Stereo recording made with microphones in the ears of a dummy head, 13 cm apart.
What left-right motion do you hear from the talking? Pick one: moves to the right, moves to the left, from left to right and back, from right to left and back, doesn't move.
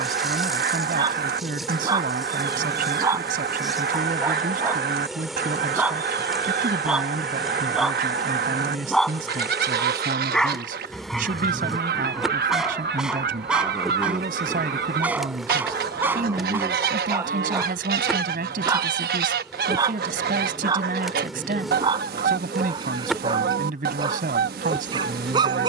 doesn't move.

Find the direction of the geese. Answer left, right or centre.
right.